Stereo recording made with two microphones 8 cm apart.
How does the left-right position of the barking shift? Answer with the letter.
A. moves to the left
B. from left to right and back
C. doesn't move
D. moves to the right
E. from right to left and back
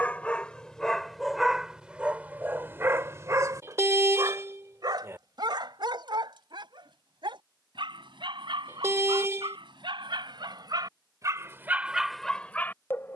B.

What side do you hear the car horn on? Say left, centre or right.
right.